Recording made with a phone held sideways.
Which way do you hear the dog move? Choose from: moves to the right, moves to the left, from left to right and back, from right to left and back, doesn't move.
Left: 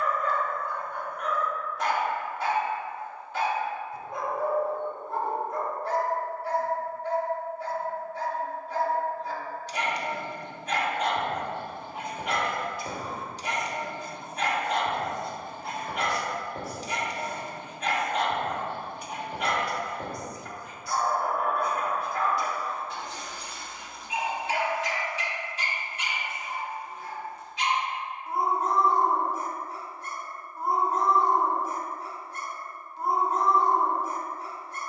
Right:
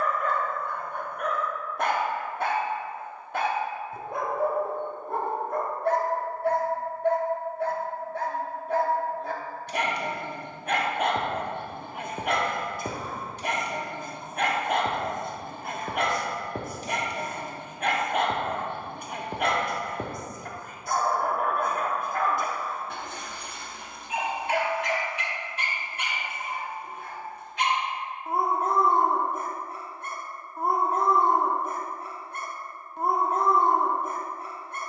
doesn't move.